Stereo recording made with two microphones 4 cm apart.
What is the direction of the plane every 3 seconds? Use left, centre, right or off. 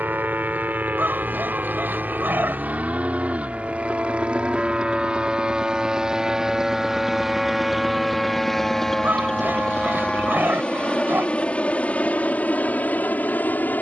right, right, centre, left, left.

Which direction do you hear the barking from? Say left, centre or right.
right.